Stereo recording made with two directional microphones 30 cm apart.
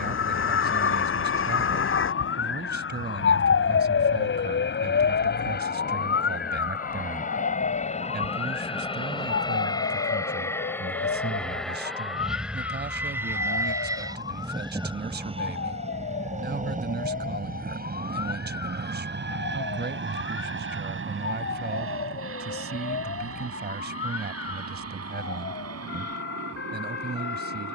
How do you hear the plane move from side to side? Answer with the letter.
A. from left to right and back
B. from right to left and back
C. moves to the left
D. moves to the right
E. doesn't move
D.